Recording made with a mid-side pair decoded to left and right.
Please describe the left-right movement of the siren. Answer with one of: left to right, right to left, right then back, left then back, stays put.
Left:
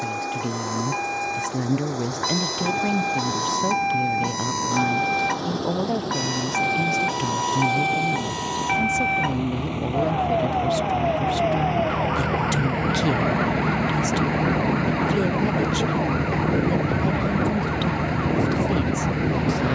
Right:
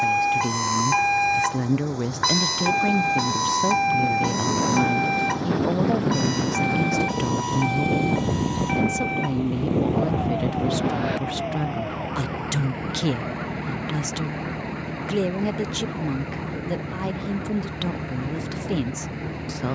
right to left.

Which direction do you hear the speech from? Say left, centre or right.
centre.